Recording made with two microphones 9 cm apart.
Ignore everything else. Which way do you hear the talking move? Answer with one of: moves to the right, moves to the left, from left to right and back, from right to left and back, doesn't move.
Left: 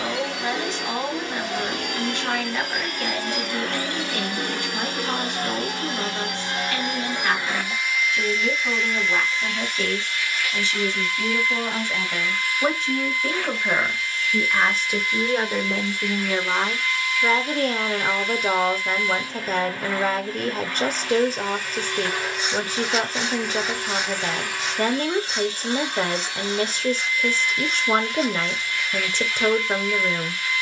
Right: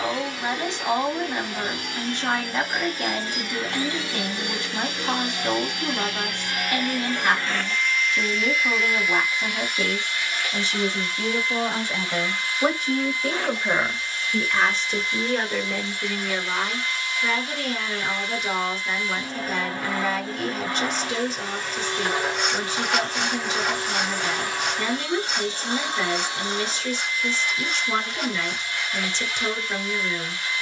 moves to the left.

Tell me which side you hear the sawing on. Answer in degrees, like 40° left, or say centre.
60° right.